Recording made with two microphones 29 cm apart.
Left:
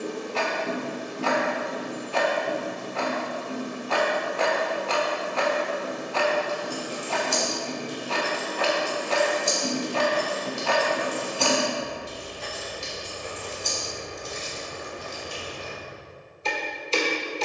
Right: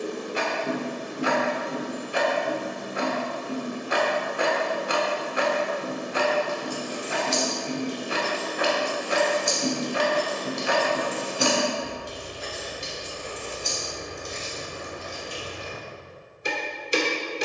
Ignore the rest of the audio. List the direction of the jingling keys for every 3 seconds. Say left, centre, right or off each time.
off, off, left, centre, centre, left.